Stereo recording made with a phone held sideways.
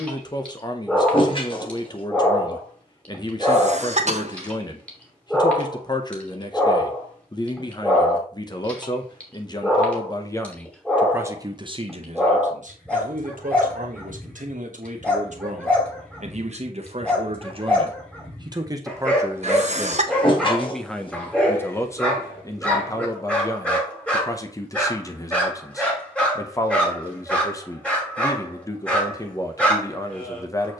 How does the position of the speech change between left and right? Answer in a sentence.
In this clip you hear the speech move from left to right and back again.